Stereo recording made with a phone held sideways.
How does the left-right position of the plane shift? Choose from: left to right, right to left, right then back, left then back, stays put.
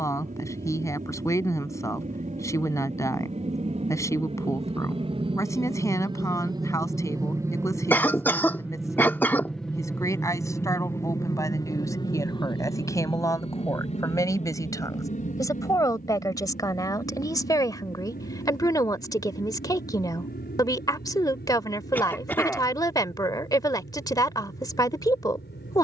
right to left.